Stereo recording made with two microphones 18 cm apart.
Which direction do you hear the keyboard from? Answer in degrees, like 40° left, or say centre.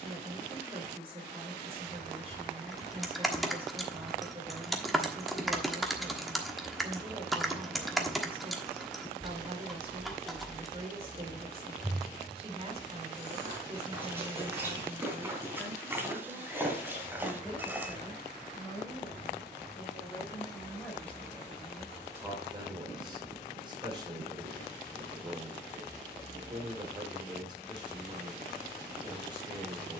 centre.